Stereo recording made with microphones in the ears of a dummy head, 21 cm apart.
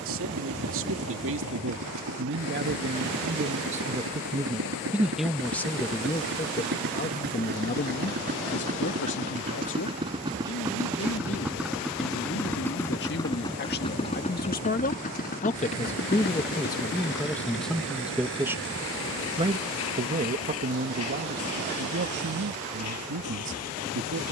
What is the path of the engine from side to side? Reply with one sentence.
You can hear the engine move from right to left.